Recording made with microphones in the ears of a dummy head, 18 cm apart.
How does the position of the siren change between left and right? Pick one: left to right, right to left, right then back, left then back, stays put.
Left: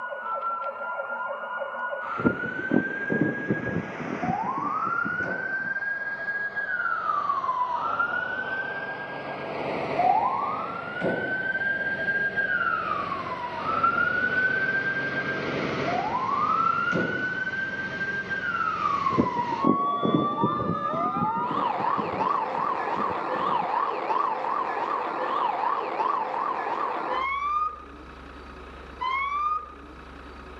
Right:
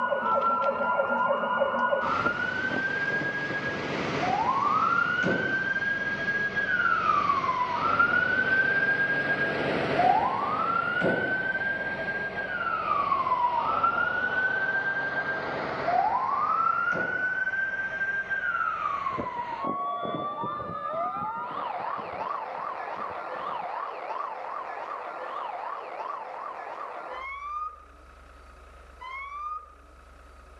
right to left.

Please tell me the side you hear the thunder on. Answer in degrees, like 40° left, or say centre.
60° left.